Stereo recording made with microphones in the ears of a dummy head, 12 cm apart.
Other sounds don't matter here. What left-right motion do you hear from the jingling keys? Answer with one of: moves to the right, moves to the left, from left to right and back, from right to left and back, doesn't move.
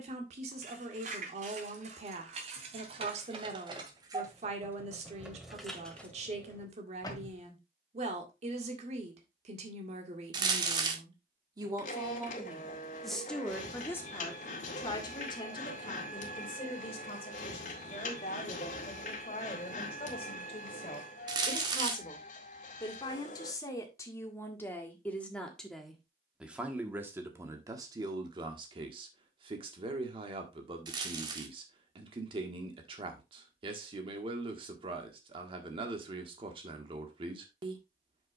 moves to the left.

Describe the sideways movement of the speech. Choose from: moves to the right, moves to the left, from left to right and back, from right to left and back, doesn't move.
from right to left and back.